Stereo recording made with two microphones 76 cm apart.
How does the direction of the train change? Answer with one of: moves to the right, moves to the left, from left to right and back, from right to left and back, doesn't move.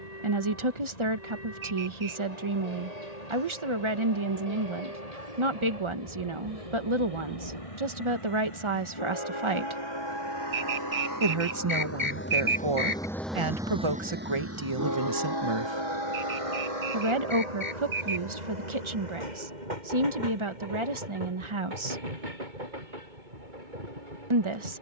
moves to the right.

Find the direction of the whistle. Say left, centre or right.
right.